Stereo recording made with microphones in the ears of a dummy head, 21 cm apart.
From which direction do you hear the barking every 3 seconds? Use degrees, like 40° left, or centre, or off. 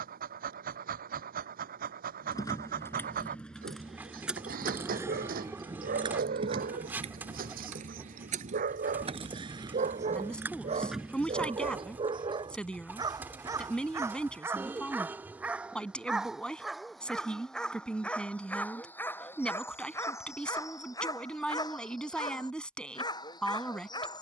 40° right, 40° right, 40° right, 30° right, 10° right, centre, 10° left, 20° left.